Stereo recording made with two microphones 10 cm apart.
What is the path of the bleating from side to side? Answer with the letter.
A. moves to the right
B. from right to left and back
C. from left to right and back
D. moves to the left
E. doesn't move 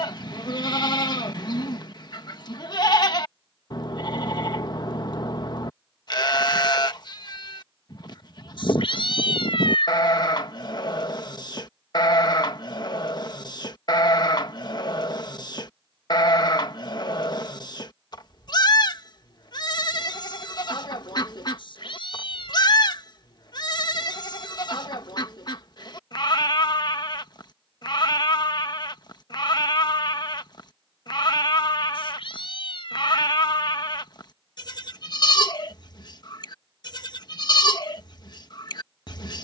E.